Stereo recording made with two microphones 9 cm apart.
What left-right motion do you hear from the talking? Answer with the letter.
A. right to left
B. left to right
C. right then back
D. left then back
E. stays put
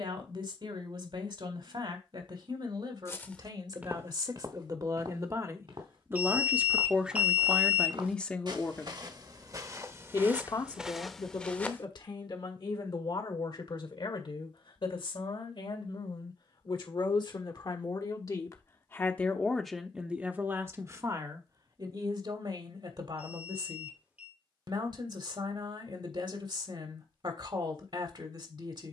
D.